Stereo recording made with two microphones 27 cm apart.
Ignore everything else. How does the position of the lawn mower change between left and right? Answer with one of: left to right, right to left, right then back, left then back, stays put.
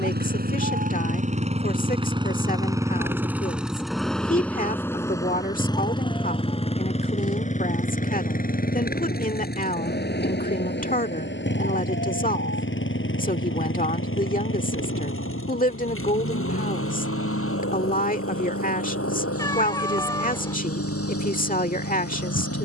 right to left.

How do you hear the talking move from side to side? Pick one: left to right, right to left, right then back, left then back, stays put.
stays put.